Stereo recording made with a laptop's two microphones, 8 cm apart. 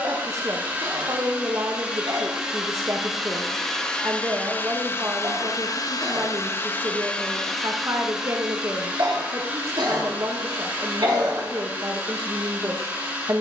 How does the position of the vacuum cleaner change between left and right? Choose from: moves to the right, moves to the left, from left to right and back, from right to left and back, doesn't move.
from right to left and back.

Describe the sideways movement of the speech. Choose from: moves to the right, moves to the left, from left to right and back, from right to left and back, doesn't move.
doesn't move.